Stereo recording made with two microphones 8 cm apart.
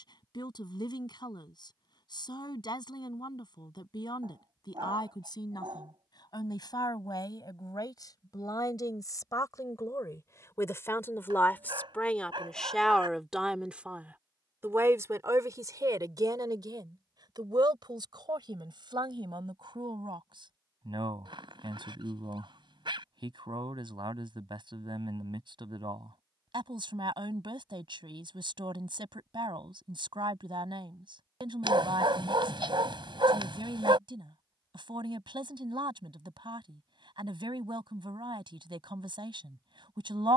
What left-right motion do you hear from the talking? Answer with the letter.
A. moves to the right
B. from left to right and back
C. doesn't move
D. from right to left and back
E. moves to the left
A.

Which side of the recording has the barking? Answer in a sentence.
You can hear the barking on the right.